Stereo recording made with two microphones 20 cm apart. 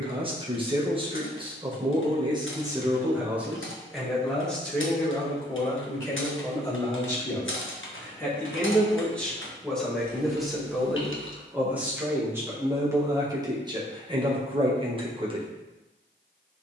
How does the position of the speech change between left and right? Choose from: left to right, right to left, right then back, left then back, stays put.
left then back.